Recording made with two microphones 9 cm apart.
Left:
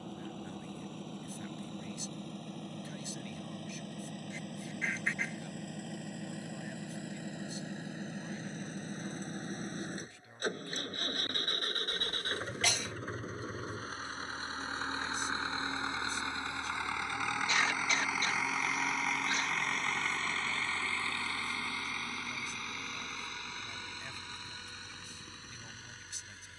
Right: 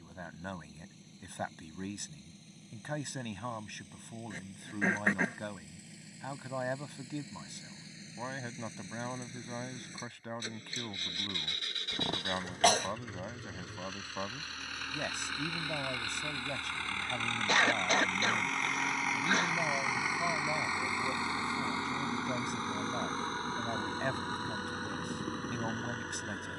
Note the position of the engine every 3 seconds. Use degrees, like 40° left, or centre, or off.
60° left, 60° left, 50° left, 50° left, 40° left, 20° left, 10° right, 30° right, 50° right.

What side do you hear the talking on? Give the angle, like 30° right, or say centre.
60° right.